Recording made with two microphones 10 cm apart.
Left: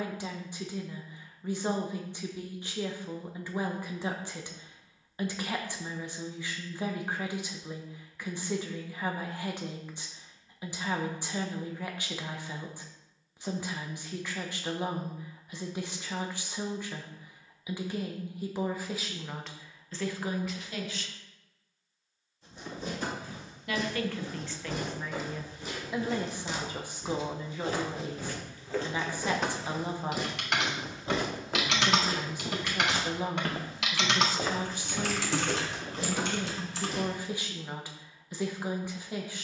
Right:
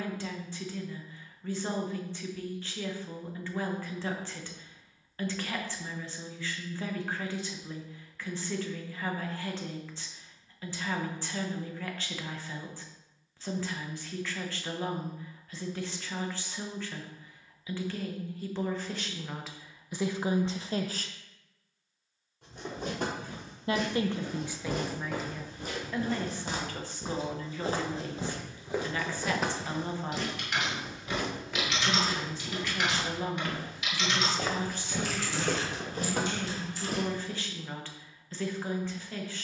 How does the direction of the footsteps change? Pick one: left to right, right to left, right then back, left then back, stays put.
left then back.